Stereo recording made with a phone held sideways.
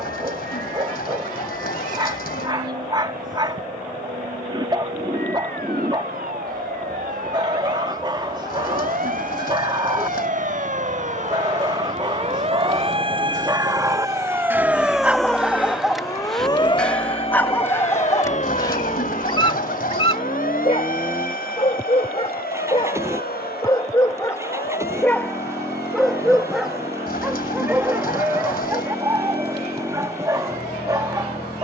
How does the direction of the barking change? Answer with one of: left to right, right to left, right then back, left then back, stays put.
left then back.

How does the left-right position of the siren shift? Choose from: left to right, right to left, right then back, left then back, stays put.
right to left.